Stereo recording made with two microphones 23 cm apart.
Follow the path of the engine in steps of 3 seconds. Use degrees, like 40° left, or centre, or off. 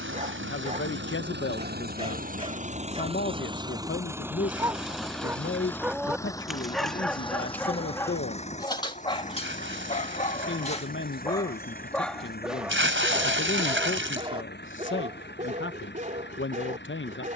50° right, 10° right, 20° left, 40° left, 50° left, 50° left.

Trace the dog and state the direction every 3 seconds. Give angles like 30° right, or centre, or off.
30° right, 10° right, 10° left, 20° left, 10° right, 30° right.